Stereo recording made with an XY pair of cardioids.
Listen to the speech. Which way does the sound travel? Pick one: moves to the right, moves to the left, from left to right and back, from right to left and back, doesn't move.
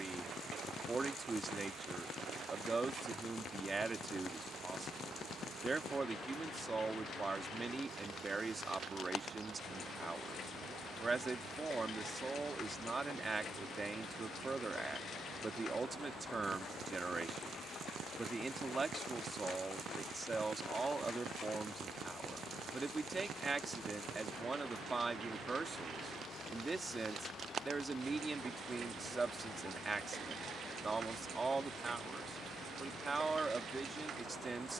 doesn't move.